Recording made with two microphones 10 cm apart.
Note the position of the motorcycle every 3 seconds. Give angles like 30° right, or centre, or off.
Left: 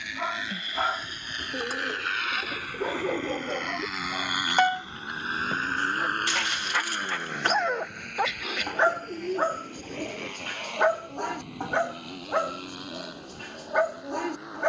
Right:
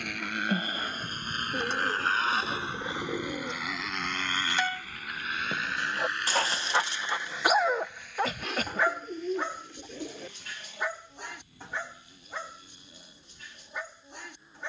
40° right, 10° left, 60° left, 70° left, 80° left.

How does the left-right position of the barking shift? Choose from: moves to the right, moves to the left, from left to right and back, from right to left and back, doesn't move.
from left to right and back.